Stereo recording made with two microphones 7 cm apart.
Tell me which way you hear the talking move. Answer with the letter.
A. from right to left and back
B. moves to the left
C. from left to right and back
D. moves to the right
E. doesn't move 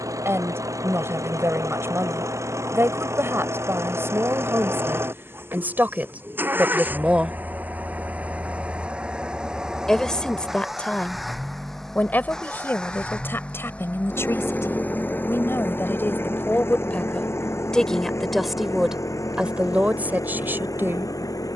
A.